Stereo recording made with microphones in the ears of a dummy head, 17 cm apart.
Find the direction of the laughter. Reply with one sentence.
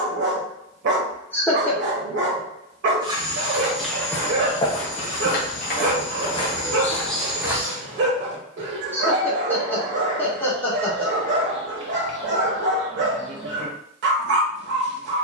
In this clip you hear the laughter in the centre.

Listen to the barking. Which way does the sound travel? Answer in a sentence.
You can hear the barking stay put.